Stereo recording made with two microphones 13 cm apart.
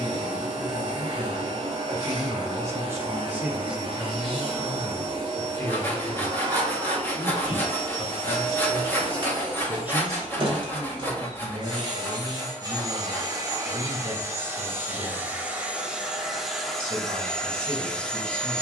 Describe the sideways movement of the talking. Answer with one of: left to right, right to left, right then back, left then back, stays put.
left then back.